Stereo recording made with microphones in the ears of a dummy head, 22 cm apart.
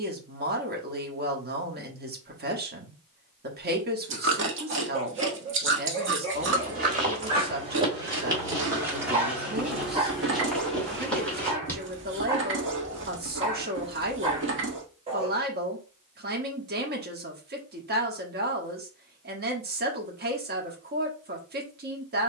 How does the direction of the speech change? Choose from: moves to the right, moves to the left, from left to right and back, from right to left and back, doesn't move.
doesn't move.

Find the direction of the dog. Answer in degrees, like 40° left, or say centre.
30° right.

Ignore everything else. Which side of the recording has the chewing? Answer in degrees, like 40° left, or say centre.
50° right.